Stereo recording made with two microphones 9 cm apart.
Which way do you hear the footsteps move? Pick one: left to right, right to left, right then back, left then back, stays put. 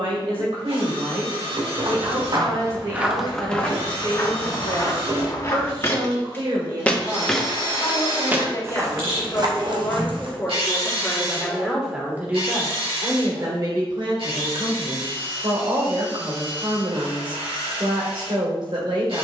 left then back.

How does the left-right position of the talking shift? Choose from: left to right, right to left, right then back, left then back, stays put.
left then back.